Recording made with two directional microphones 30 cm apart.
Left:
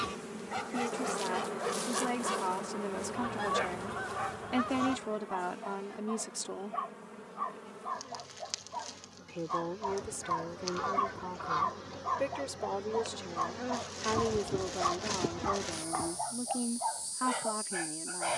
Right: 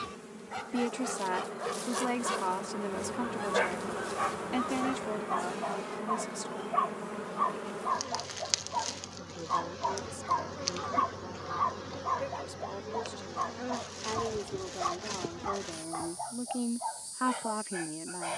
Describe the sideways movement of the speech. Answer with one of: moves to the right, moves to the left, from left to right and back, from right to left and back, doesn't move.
from right to left and back.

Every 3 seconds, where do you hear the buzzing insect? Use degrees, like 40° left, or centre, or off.
20° left, 40° right, 60° right, 30° right, centre, 20° left.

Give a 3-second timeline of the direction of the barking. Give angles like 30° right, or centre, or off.
centre, 50° right, 40° right, 20° right, centre, 20° left.